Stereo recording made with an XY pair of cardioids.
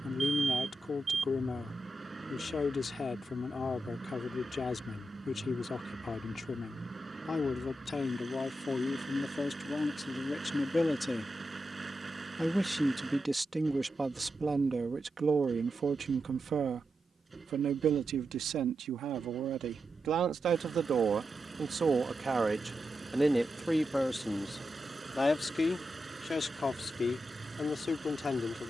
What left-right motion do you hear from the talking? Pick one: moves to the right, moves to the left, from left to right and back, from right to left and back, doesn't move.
from left to right and back.